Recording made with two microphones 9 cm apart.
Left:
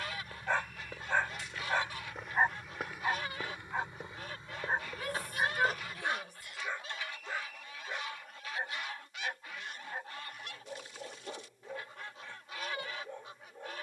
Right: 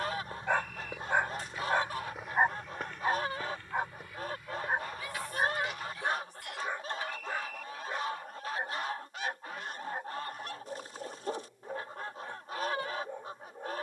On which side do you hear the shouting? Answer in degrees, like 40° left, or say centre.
60° left.